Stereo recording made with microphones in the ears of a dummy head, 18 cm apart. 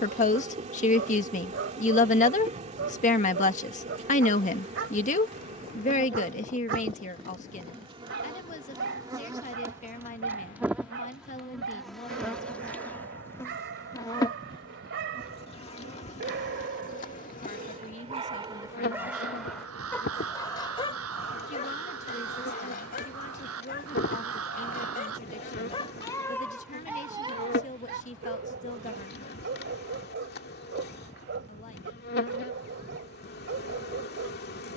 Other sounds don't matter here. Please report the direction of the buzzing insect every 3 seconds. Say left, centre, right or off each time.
right, right, right, centre, centre, left, left, left, left, left, left, left.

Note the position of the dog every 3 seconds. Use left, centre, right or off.
right, right, right, right, right, right, centre, left, left, right, right, right.